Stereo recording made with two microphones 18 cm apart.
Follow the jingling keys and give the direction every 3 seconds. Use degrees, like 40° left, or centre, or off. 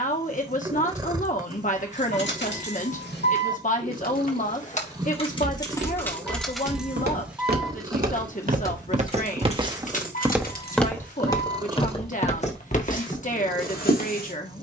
70° left, 40° left, centre, 50° left, off.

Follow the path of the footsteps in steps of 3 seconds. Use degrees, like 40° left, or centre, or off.
off, 70° right, 60° right, centre, 50° left.